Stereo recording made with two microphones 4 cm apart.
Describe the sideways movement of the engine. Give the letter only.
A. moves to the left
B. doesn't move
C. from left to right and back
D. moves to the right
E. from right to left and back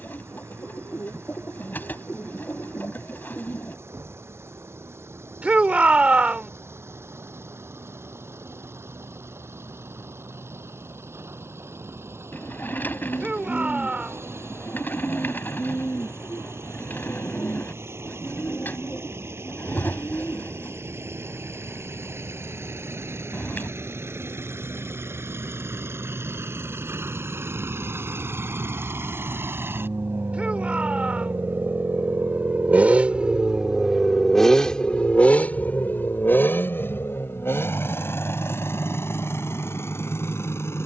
A.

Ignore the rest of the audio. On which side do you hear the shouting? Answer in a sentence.
You can hear the shouting on the right.